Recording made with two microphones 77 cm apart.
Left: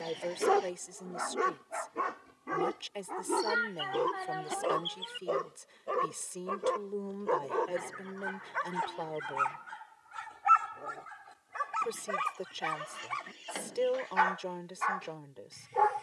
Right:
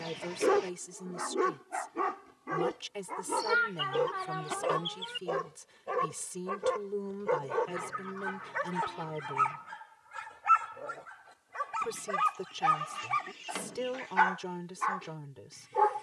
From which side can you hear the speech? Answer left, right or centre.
right.